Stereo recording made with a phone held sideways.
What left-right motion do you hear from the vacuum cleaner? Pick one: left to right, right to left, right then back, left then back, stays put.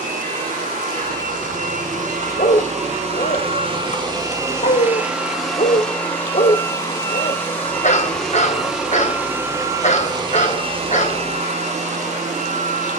left then back.